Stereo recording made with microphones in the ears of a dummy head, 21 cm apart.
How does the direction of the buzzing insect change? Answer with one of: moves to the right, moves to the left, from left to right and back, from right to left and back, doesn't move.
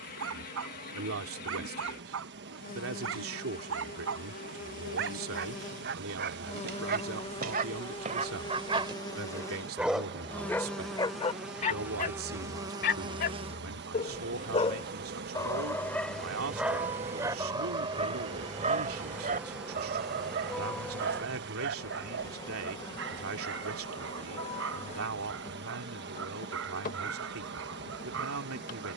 from left to right and back.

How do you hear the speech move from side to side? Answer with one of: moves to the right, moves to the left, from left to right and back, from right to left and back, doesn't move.
doesn't move.